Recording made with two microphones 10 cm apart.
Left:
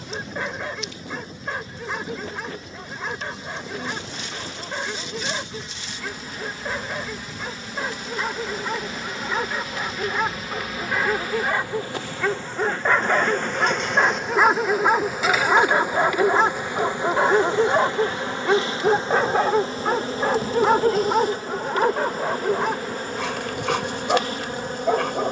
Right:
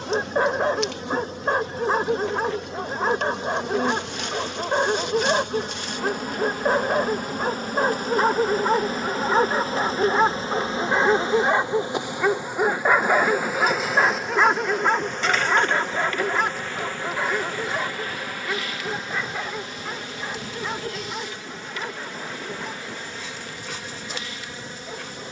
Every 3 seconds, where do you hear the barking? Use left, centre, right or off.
right, right, right, right, centre, left, left, left, left.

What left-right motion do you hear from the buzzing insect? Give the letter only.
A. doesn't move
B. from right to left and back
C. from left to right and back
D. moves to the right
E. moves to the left
E.